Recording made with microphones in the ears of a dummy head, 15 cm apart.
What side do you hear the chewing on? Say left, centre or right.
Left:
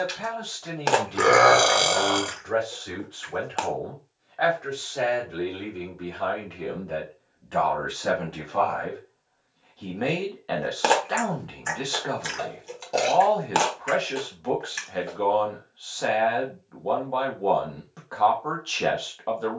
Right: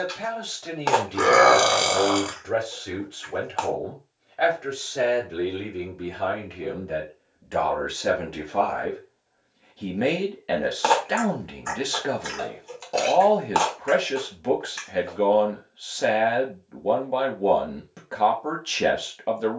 left.